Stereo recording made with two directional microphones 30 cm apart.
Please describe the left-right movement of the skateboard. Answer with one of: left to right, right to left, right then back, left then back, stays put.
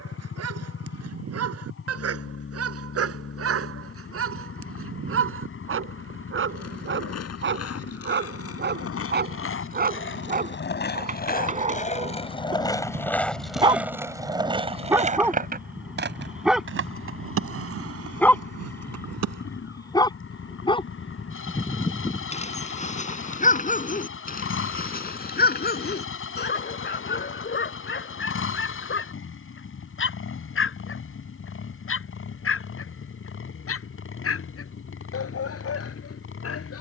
left to right.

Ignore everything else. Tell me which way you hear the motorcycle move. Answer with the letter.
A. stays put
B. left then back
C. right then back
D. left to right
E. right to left
A.